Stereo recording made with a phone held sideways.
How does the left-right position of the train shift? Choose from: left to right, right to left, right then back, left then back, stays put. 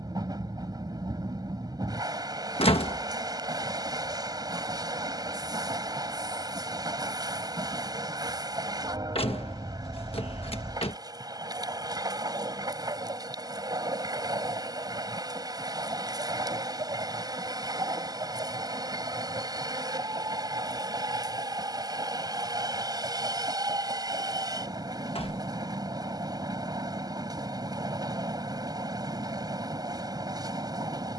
stays put.